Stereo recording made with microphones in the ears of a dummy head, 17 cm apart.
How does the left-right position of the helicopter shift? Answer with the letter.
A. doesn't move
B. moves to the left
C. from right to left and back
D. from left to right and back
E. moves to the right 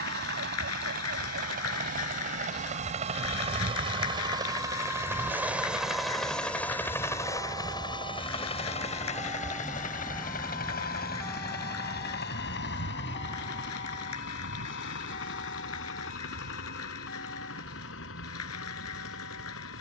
B.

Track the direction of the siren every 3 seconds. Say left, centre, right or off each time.
right, right, right, centre, left, left, left.